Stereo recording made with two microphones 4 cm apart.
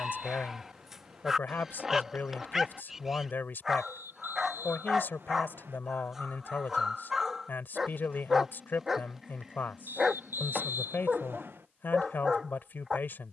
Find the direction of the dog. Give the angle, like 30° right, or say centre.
10° right.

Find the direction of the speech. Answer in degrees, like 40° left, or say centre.
50° left.